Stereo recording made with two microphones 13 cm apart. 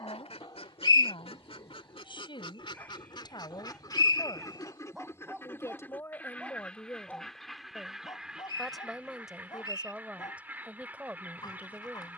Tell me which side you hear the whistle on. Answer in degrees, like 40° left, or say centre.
30° left.